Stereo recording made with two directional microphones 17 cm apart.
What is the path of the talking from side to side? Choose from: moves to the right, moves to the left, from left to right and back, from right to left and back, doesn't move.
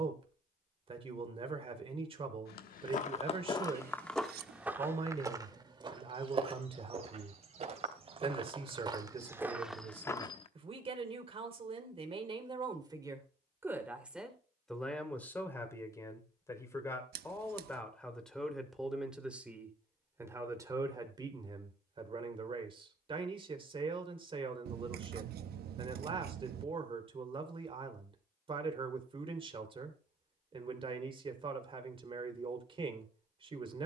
from right to left and back.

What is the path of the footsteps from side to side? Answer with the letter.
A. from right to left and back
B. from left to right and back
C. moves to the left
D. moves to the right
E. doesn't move
B.